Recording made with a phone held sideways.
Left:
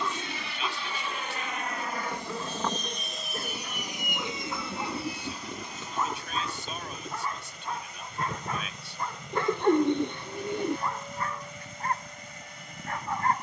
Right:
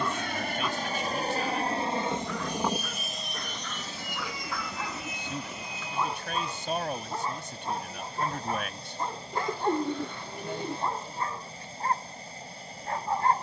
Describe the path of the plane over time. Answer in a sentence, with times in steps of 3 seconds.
You can hear the plane on the right from 0 s and on the left from 3 s.